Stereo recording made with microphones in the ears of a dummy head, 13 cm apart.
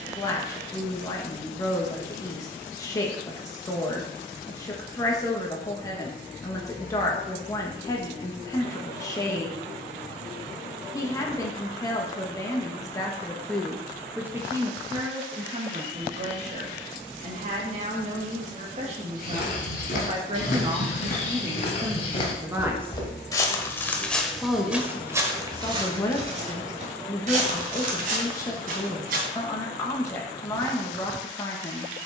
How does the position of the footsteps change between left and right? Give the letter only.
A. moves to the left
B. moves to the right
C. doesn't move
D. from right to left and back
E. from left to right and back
B.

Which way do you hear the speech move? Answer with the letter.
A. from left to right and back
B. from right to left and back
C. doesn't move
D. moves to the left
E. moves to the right
A.